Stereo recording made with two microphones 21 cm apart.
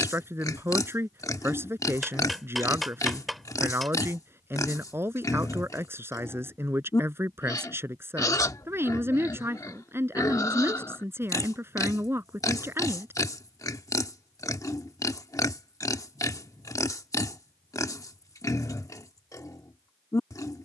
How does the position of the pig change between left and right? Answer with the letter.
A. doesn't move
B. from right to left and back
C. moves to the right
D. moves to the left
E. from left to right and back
A.